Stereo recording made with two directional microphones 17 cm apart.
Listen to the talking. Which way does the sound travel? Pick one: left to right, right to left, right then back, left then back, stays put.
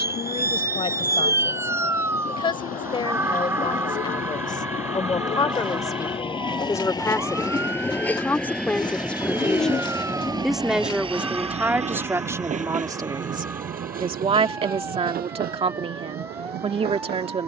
left to right.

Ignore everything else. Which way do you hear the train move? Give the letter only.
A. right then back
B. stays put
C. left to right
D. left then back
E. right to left
C.